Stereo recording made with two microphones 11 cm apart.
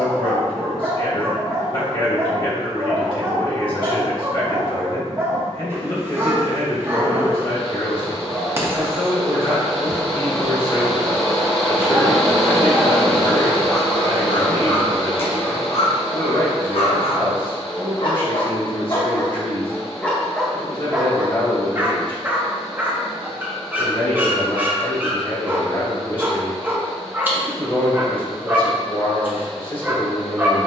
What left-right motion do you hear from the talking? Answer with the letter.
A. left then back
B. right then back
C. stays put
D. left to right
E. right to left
C.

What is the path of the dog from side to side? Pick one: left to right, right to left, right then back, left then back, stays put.
left then back.